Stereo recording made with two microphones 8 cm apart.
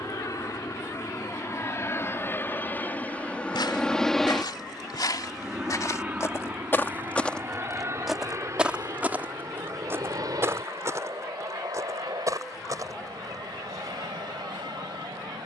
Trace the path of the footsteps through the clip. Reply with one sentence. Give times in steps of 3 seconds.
In this clip you hear the footsteps not at all from 0 s, on the left from 3 s, in the centre from 6 s and on the right from 9 s.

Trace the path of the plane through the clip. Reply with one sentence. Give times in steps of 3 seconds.
In this clip you hear the plane on the left from 0 s, in the centre from 3 s and on the right from 6 s.